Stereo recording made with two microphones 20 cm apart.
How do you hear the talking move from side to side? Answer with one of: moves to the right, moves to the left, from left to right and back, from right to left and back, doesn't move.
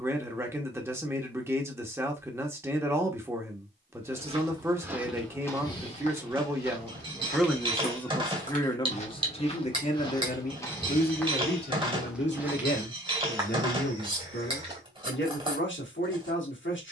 moves to the left.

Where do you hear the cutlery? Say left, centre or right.
right.